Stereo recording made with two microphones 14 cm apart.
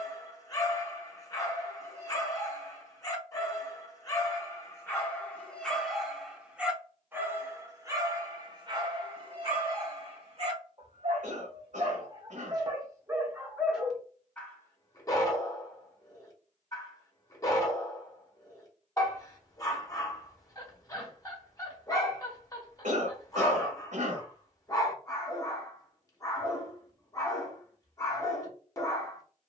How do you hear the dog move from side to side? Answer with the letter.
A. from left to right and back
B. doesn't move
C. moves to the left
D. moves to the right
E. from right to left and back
A.